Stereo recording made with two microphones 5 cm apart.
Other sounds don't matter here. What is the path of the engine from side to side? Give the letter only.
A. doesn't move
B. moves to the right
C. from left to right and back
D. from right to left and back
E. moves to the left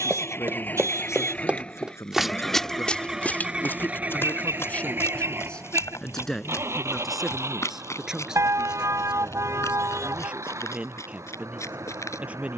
B.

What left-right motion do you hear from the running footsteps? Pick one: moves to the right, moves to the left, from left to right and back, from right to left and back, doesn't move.
moves to the left.